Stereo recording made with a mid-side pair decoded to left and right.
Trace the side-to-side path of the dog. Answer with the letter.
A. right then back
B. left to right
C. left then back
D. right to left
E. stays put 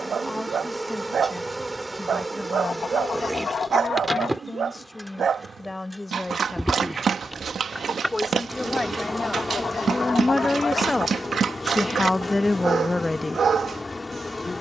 E.